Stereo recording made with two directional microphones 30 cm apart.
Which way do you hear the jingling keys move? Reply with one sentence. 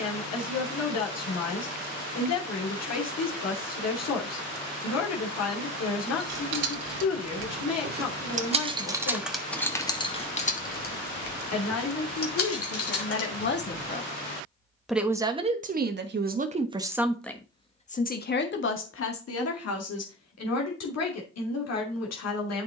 In this clip you hear the jingling keys travel towards the left.